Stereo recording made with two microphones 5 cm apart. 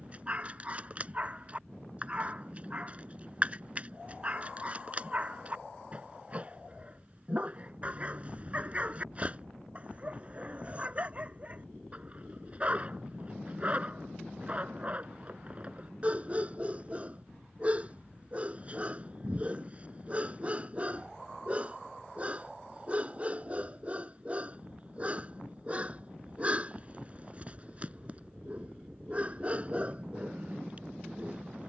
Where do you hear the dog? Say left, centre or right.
right.